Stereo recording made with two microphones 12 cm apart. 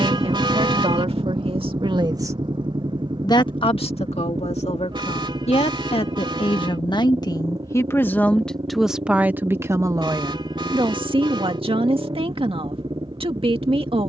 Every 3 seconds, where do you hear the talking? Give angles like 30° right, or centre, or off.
50° right, 60° left, 30° left, 40° right, 50° right.